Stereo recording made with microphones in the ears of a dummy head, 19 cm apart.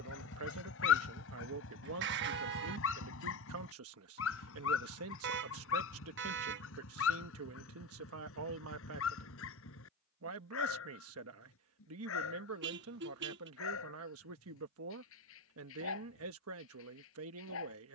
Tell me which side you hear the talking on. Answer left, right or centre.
right.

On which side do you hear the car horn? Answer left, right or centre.
right.